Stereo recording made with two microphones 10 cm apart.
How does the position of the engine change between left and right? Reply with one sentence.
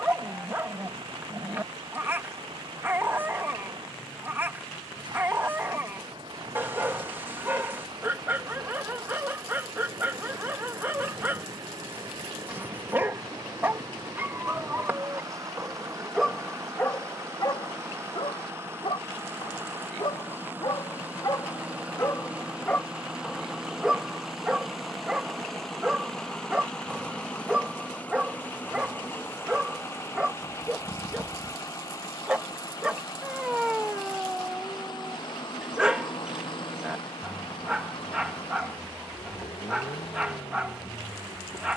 You can hear the engine travel towards the left.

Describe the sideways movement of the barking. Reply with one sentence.
You can hear the barking go left and come back.